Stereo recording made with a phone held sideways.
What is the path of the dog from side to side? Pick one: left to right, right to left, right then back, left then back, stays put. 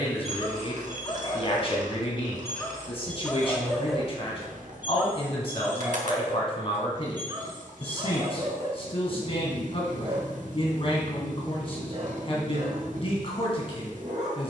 left to right.